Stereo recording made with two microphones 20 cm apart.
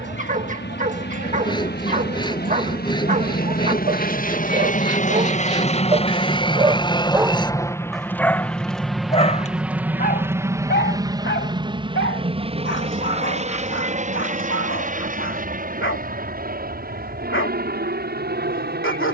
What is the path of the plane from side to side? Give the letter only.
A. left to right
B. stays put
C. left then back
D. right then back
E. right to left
A.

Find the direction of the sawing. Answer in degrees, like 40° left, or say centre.
20° left.